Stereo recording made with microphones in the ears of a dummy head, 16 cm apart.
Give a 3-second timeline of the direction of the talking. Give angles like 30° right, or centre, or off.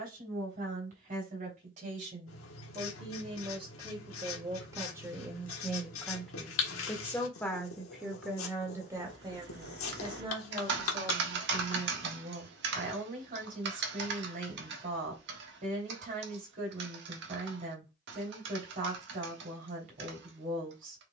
40° right, 20° right, centre, 30° right, 50° right, 50° right, 50° right.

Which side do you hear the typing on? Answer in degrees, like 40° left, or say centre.
70° right.